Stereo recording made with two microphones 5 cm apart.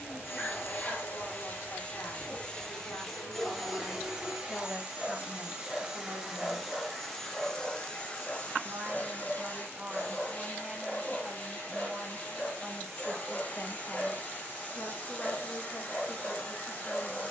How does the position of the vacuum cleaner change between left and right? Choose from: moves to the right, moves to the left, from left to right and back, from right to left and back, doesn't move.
from left to right and back.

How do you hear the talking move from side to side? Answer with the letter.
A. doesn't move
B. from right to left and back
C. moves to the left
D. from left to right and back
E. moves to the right
D.